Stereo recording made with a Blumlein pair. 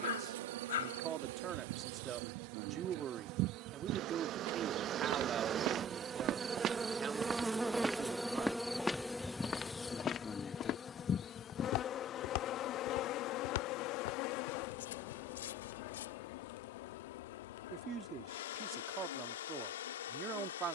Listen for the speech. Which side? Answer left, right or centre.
right.